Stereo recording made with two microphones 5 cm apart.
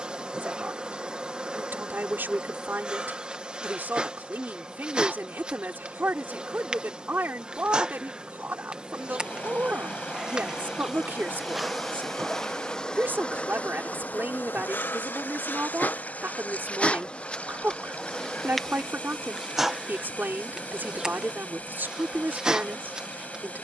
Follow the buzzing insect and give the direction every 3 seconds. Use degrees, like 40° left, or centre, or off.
20° right, 20° right, 20° right, 10° right, 30° left, 30° left, 10° right, 20° right.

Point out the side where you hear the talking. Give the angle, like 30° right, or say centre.
50° right.